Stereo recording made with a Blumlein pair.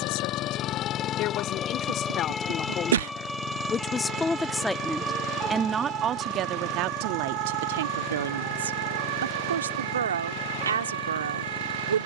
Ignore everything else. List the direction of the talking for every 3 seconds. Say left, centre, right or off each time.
left, centre, right, right.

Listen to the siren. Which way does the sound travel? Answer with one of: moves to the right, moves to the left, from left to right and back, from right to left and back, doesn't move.
moves to the right.